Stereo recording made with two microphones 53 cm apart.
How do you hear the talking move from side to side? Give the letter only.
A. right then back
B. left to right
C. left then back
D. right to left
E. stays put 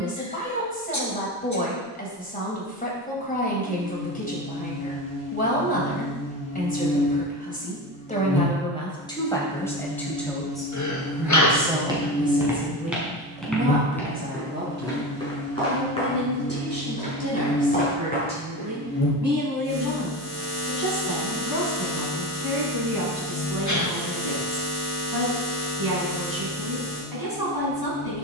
B.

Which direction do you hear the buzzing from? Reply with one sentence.
In this clip you hear the buzzing on the left.